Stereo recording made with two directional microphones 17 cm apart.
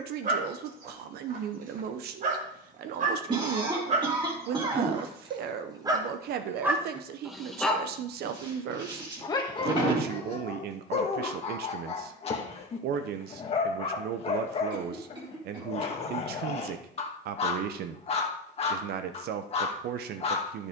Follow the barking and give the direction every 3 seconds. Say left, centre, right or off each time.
right, right, centre, left, left, left, left.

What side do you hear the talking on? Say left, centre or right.
right.